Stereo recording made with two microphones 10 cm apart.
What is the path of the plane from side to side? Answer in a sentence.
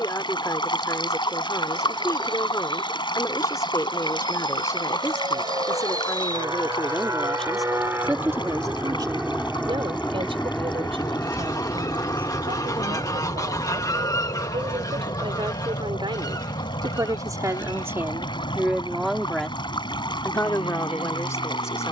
In this clip you hear the plane travel towards the left.